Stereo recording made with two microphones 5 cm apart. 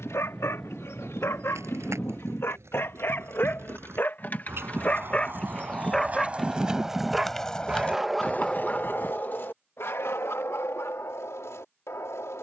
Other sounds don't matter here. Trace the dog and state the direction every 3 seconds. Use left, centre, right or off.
left, left, centre, left.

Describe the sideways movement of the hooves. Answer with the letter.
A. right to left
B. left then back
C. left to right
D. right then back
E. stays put
A.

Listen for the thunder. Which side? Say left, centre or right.
centre.